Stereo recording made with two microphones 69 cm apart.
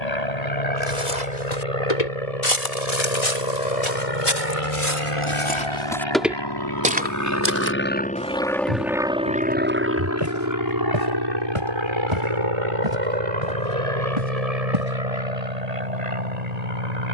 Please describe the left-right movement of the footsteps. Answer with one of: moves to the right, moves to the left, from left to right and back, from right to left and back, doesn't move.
moves to the right.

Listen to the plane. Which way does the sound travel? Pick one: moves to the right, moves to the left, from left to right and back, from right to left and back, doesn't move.
moves to the right.